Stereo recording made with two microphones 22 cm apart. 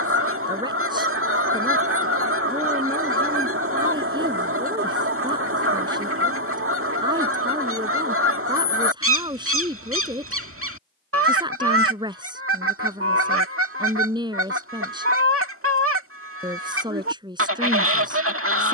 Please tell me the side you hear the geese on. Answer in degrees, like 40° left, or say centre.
80° right.